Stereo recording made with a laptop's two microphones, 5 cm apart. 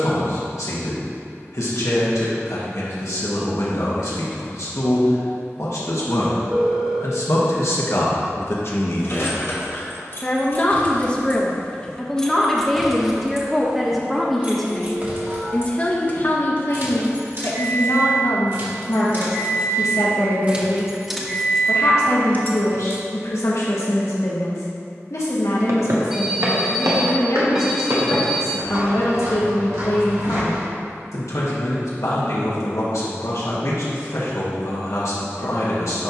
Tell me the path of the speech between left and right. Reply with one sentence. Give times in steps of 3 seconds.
You can hear the speech on the left from 0 s, in the centre from 12 s and on the left from 15 s.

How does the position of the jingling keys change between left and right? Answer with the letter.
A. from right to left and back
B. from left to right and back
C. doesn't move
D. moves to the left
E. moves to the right
B.